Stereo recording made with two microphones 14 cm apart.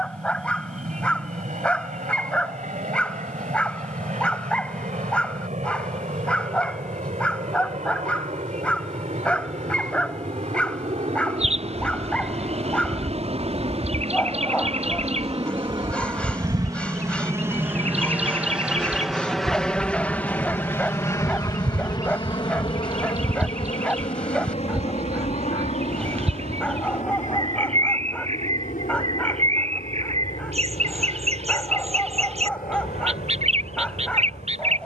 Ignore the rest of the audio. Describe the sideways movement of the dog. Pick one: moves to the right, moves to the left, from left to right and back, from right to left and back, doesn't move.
doesn't move.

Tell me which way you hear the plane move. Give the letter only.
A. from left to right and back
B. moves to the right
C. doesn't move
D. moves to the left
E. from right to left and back
D.